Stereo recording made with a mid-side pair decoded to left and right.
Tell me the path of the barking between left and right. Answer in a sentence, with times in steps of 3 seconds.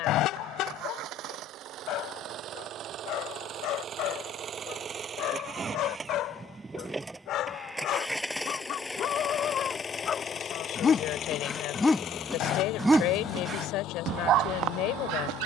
In this clip you hear the barking on the left from 0 s and on the right from 12 s.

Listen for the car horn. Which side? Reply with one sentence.
You can hear the car horn on the left.